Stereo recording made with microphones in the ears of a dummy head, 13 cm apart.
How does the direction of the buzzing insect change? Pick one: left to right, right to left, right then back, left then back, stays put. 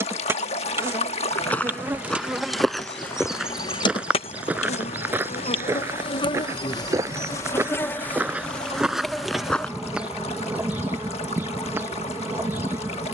left then back.